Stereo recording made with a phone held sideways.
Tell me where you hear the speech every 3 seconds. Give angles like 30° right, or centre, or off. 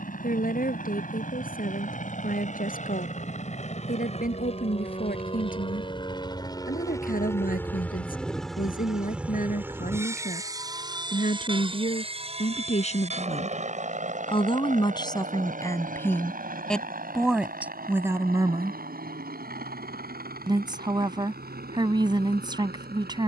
60° left, 60° left, 60° left, 60° left, 40° left, 10° left, 20° right, 30° right.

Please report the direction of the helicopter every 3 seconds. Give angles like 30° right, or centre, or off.
60° left, 40° left, 10° left, 20° right, 40° right, 60° right, 70° right, 70° right.